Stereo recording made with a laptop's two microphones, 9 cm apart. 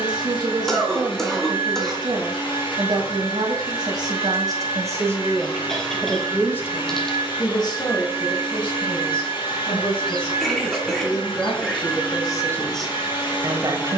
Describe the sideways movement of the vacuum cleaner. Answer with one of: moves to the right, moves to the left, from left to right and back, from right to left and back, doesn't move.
doesn't move.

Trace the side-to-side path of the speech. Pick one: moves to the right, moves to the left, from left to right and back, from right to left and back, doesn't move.
from right to left and back.